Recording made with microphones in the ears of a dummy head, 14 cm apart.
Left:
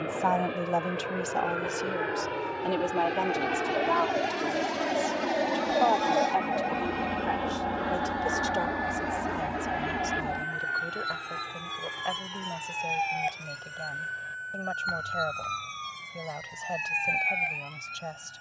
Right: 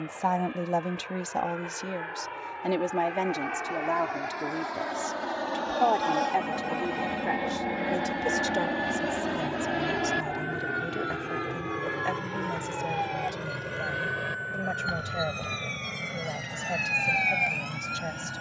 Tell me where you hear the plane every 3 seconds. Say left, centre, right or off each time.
left, left, centre, right, right, right.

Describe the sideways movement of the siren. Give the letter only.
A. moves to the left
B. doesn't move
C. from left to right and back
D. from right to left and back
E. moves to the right
E.